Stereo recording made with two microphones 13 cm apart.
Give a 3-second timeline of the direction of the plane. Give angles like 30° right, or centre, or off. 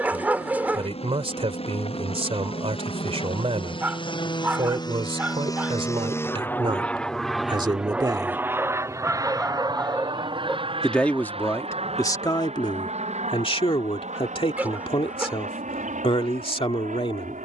60° left, 40° left, centre, 40° right, 60° right, 70° right.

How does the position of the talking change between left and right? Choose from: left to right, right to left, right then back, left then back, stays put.
right to left.